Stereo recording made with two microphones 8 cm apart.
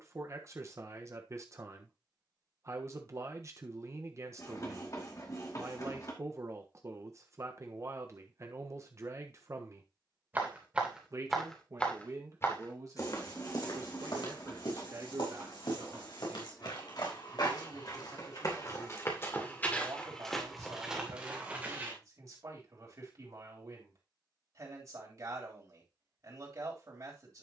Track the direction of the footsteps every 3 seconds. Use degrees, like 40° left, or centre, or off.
off, off, off, centre, 60° left, 70° left, 20° left, 20° right, off.